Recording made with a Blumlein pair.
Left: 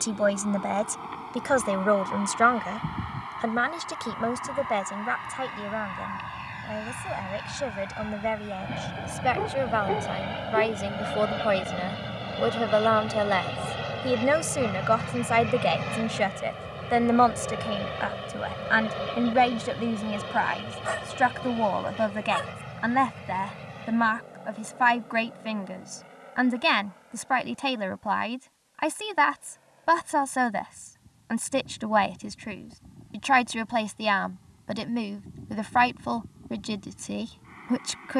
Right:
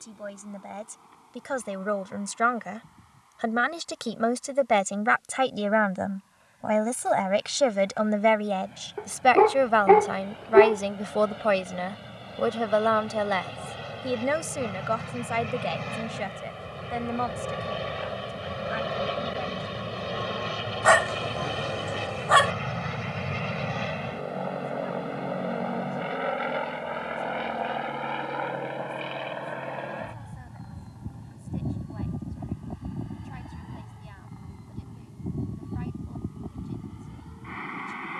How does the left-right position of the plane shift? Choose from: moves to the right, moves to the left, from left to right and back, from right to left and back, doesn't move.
moves to the right.